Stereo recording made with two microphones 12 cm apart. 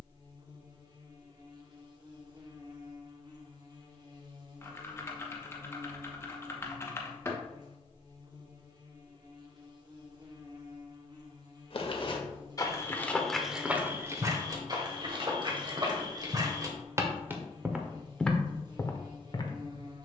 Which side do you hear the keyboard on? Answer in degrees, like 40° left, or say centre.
20° left.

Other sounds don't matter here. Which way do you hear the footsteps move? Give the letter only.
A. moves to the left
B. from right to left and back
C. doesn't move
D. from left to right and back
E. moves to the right
D.